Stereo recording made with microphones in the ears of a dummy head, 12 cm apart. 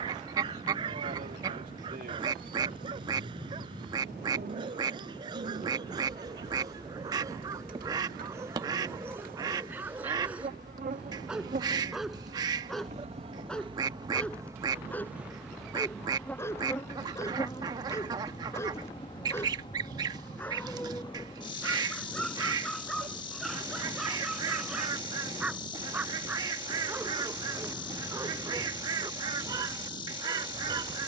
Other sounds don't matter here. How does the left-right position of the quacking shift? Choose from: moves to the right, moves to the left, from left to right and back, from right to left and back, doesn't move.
doesn't move.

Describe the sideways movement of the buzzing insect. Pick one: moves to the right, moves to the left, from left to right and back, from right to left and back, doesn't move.
moves to the left.